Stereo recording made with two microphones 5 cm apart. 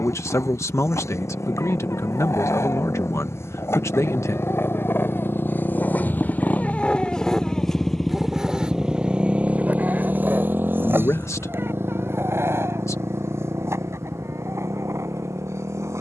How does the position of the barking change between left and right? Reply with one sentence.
In this clip you hear the barking travel towards the right.